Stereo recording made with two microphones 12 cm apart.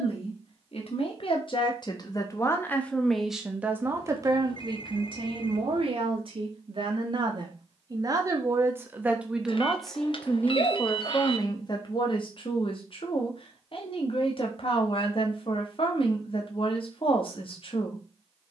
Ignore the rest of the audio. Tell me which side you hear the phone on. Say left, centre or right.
left.